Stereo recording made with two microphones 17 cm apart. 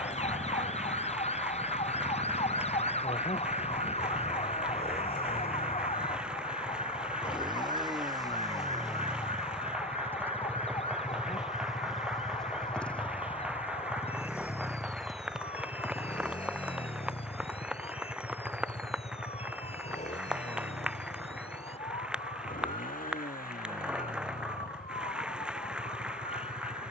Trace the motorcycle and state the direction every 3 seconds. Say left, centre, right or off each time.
right, right, right, centre, centre, left, left, left, left.